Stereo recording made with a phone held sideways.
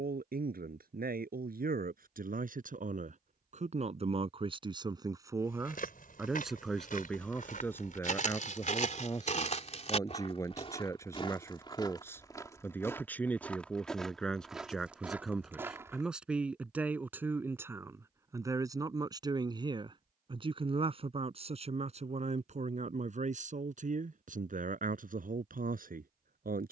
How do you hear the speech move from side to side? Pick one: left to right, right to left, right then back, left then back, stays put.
left then back.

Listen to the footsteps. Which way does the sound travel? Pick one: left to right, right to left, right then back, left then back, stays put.
left to right.